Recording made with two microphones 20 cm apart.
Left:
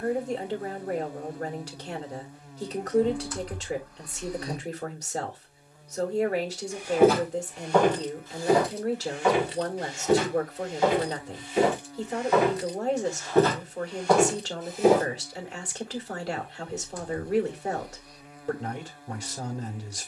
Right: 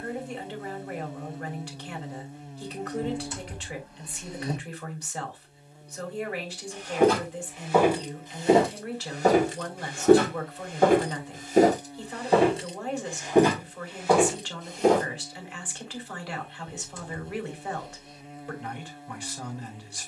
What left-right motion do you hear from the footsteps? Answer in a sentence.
You can hear the footsteps go right and come back.